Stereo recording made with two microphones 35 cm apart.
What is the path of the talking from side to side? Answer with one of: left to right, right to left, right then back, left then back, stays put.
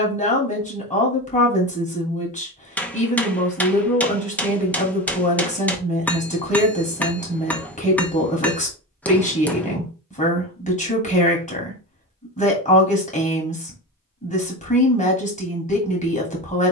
stays put.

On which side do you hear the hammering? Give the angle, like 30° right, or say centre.
centre.